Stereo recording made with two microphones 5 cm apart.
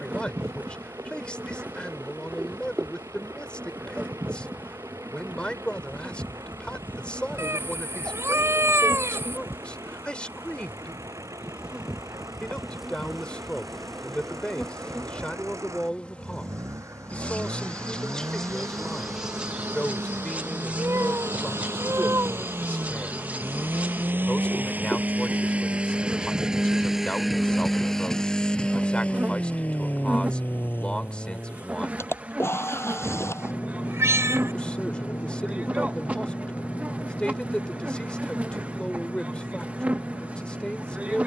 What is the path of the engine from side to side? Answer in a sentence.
In this clip you hear the engine move from right to left.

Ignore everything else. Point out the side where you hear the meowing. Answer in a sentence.
In this clip you hear the meowing on the right.